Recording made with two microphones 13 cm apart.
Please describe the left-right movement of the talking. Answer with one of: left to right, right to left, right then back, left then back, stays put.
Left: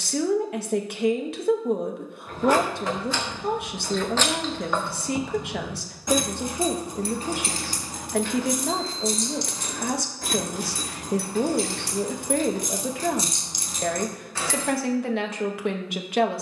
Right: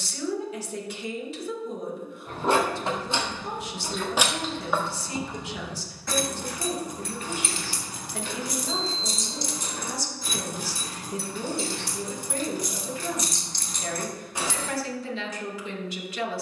stays put.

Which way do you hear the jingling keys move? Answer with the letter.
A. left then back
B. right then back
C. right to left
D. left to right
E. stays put
A.